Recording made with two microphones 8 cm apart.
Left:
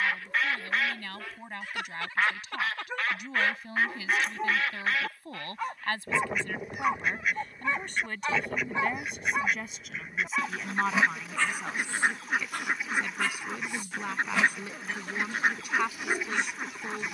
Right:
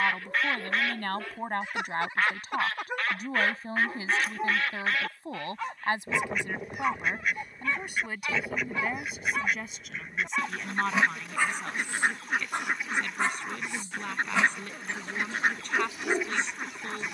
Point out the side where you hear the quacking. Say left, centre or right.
centre.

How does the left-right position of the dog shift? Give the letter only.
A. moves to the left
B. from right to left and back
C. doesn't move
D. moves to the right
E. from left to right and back
B.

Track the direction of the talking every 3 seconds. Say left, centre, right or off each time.
right, right, centre, centre, centre, centre.